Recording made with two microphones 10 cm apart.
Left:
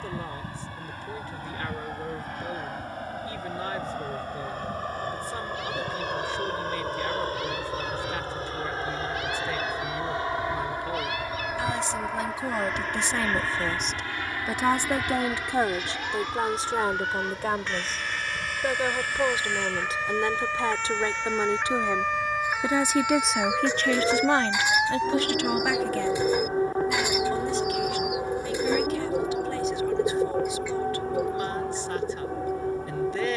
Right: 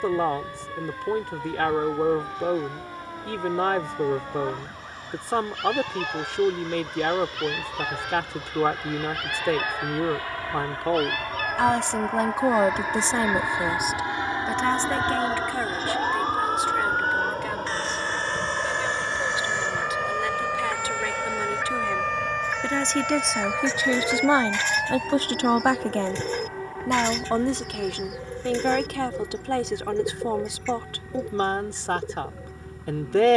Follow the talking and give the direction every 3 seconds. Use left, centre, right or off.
right, right, right, right, right, left, left, centre, right, right, right.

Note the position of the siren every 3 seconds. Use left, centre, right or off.
right, right, right, right, right, right, right, centre, left, left, left.